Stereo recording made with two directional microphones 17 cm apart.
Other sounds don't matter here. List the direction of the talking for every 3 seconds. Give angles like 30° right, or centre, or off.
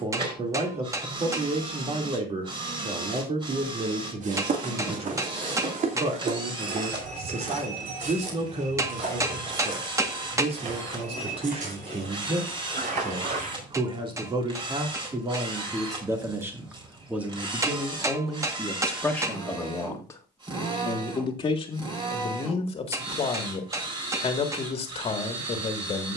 40° right, 40° right, 40° right, 40° right, 30° right, 10° right, 10° left, 30° left, 30° left.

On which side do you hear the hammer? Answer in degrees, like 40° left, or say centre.
20° right.